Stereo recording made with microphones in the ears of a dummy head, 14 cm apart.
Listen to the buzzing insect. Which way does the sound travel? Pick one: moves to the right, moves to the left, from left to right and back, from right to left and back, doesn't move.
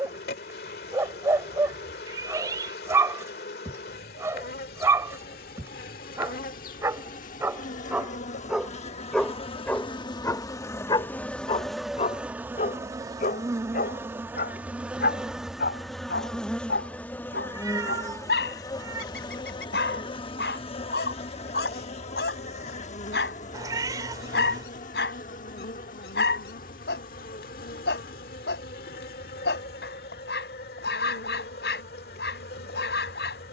from left to right and back.